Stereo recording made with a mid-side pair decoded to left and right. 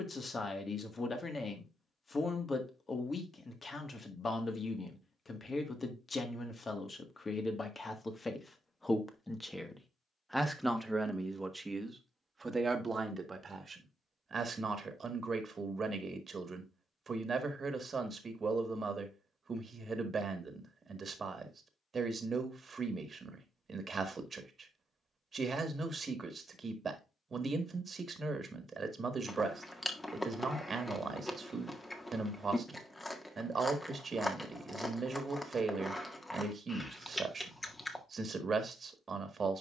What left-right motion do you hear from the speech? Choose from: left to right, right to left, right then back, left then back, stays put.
left to right.